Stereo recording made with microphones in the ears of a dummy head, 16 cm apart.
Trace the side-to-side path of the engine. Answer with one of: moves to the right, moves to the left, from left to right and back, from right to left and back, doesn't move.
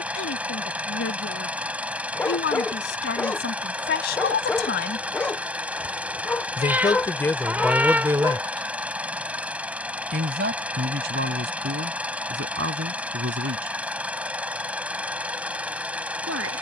doesn't move.